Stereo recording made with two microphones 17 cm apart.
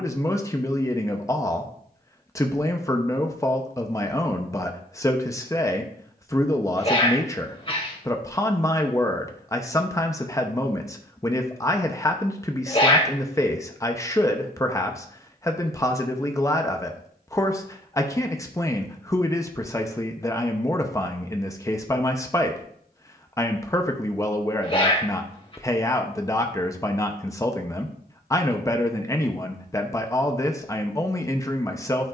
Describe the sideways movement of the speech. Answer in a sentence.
You can hear the speech stay put.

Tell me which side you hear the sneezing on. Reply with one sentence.
You can hear the sneezing on the left.